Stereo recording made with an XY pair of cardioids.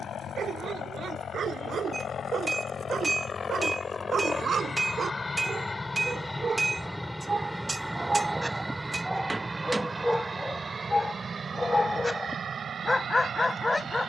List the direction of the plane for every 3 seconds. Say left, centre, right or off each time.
left, left, centre, right, right.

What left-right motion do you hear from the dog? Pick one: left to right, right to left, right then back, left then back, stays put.
right to left.